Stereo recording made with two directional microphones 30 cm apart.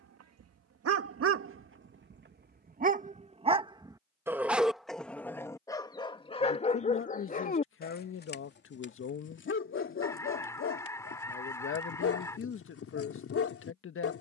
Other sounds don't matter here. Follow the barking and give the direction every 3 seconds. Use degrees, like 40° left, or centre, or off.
40° right, centre, 30° left, 40° left, 50° left.